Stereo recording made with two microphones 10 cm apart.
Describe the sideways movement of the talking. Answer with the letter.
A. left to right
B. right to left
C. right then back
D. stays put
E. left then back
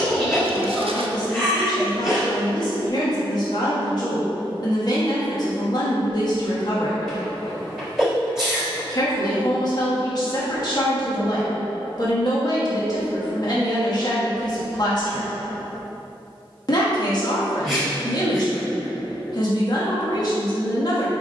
D.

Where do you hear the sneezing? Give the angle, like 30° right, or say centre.
centre.